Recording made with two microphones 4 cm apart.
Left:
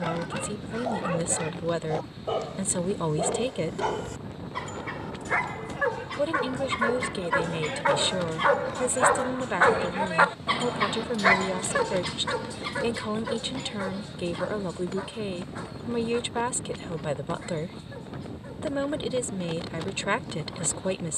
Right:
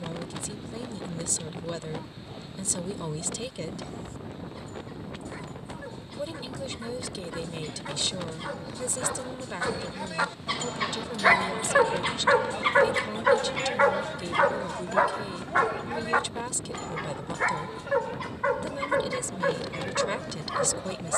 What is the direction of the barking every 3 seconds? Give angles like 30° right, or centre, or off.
80° left, 70° left, 60° left, 20° left, 50° right, 70° right, 80° right.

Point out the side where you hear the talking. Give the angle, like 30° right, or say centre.
30° left.